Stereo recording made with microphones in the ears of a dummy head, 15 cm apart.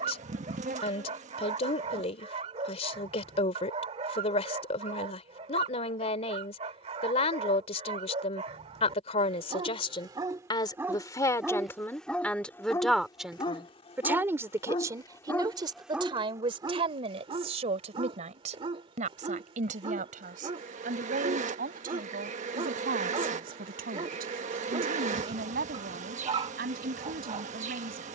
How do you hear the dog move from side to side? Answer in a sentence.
You can hear the dog move from right to left and back again.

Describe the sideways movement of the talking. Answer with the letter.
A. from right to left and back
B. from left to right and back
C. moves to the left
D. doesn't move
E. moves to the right
E.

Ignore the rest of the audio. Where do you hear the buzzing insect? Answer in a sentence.
In this clip you hear the buzzing insect on the right.